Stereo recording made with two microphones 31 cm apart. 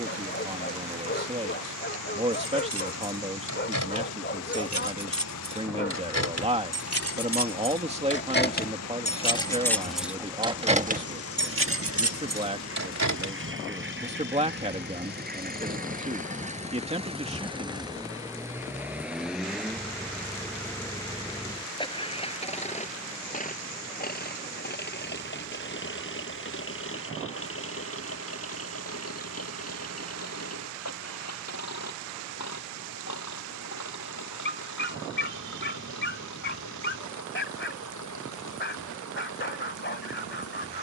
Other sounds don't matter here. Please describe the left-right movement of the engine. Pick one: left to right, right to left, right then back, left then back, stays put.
right to left.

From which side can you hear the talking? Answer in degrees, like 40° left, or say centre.
20° right.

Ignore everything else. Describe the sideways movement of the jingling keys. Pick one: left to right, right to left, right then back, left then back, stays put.
left to right.